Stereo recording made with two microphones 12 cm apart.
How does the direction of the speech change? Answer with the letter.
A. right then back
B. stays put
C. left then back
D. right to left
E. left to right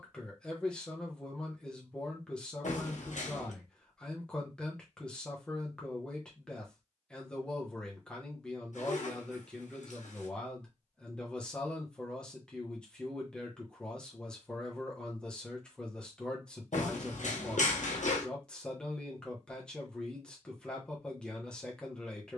B.